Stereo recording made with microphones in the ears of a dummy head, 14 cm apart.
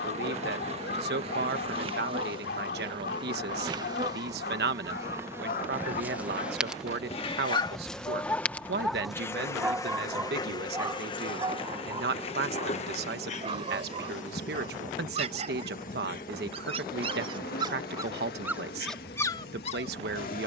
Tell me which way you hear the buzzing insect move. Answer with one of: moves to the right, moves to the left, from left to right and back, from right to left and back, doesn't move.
moves to the left.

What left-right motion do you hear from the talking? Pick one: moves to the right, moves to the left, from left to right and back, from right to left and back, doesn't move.
doesn't move.